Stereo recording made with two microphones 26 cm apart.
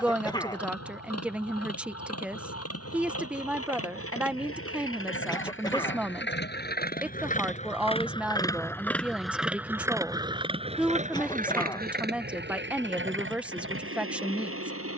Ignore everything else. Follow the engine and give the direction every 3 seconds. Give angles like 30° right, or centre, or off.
70° left, 60° left, 30° left, 20° right, 50° right.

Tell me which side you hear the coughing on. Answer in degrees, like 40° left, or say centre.
20° left.